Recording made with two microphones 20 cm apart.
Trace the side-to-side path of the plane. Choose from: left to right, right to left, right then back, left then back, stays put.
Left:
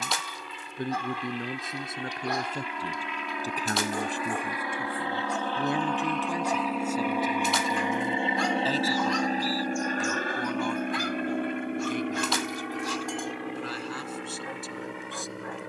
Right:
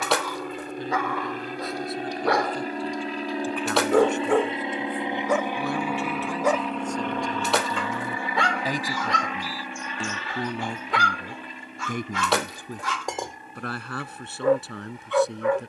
right to left.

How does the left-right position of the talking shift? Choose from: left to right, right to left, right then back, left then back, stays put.
left to right.